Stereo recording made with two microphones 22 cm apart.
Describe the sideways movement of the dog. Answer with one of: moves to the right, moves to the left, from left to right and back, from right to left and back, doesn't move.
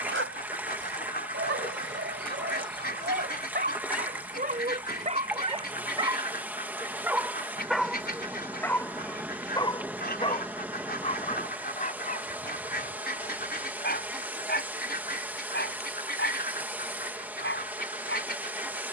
moves to the left.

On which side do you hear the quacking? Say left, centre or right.
left.